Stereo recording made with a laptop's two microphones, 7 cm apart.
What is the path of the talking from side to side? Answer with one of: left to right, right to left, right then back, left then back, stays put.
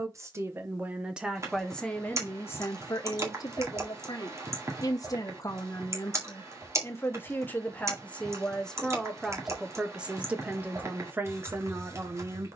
left then back.